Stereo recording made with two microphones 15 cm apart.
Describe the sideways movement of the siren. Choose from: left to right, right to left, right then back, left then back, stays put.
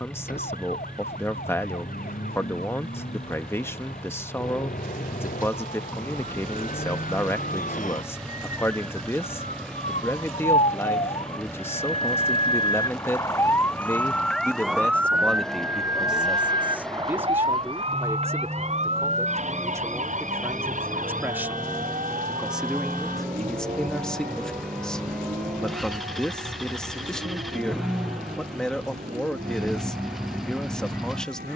left to right.